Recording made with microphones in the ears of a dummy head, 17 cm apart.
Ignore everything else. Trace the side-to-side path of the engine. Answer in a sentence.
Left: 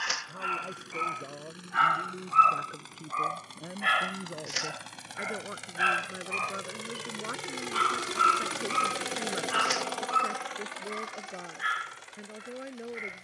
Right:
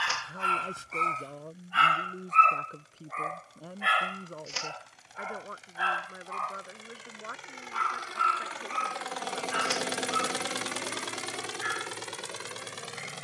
In this clip you hear the engine travel towards the right.